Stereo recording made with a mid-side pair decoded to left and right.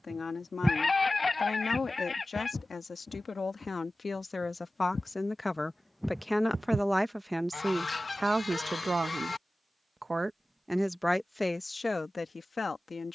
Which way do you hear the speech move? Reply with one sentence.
You can hear the speech go right and come back.